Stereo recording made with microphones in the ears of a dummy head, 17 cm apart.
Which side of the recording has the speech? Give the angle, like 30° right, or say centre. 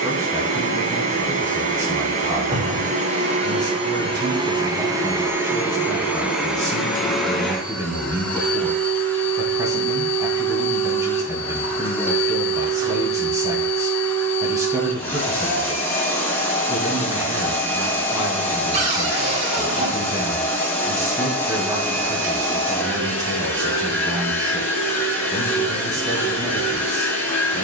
20° right.